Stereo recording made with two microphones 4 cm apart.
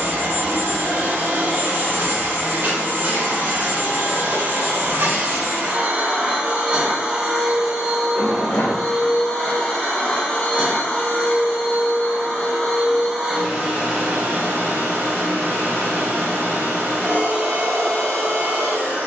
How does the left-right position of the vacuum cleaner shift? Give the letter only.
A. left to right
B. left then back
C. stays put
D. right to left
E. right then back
B.